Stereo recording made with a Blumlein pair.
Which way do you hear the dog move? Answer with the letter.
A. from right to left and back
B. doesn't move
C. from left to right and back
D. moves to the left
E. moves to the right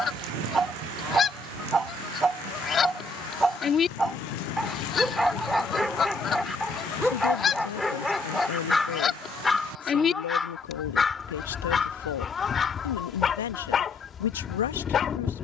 D.